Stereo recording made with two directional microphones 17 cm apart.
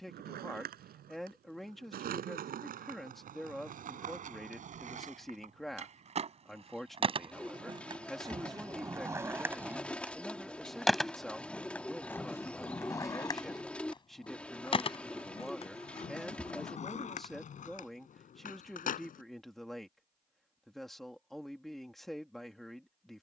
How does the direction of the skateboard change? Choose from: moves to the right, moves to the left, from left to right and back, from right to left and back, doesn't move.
moves to the left.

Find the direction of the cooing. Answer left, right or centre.
centre.